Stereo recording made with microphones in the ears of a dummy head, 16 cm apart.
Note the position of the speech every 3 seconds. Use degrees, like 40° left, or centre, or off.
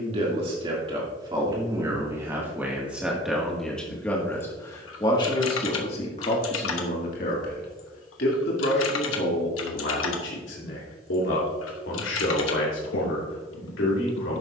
20° right, 10° left, 50° left, 70° left, 80° left.